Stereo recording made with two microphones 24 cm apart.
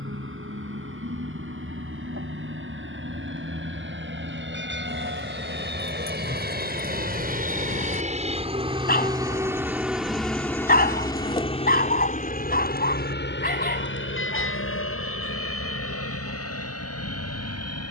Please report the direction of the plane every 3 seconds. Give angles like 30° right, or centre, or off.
70° right, 60° right, 40° right, 10° left, 40° left, 60° left.